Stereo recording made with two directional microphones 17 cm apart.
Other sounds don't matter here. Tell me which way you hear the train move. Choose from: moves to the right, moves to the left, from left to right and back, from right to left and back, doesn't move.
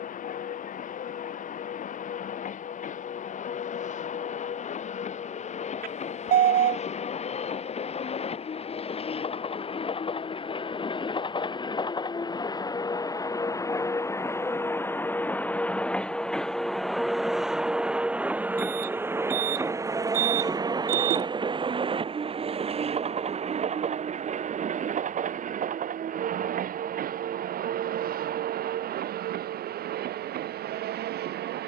moves to the right.